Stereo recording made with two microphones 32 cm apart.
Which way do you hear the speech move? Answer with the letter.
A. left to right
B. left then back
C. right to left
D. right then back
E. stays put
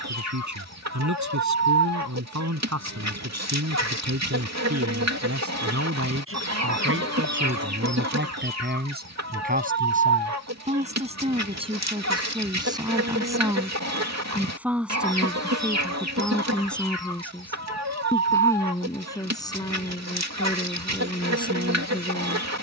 C.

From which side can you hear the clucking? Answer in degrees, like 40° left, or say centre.
50° right.